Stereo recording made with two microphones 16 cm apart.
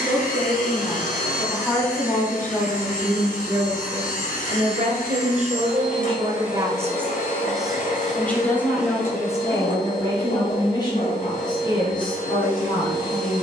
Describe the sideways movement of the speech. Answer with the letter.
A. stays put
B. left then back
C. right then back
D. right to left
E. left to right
C.